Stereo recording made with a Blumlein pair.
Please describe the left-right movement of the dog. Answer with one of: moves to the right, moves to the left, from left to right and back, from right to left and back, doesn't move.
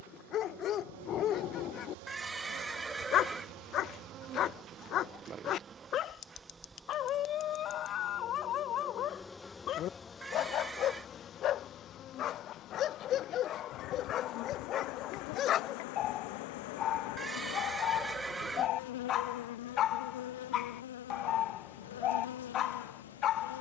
doesn't move.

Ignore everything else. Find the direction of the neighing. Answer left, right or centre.
centre.